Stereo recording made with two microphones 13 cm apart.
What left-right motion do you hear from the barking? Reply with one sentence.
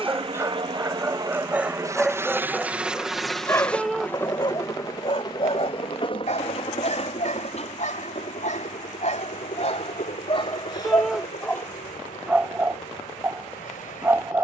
In this clip you hear the barking go left and come back.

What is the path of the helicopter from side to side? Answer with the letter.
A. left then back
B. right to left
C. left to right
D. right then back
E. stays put
B.